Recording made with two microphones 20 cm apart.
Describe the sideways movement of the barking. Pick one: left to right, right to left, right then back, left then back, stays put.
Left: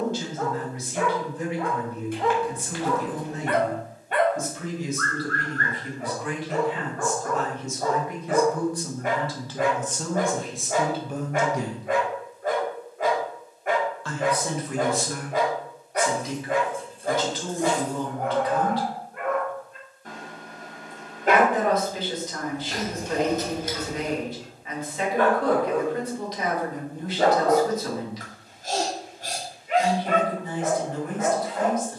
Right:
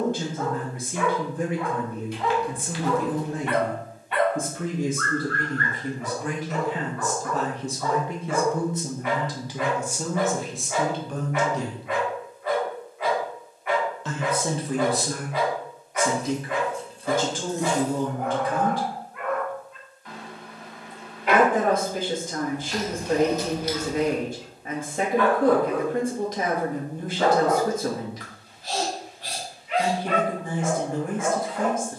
stays put.